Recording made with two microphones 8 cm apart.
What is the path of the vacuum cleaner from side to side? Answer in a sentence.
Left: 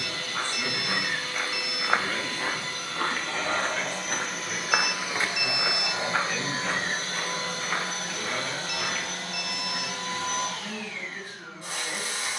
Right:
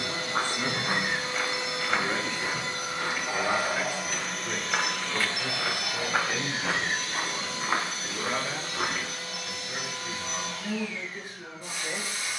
In this clip you hear the vacuum cleaner go from the right side to the left.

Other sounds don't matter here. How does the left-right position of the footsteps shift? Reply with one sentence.
In this clip you hear the footsteps go left and come back.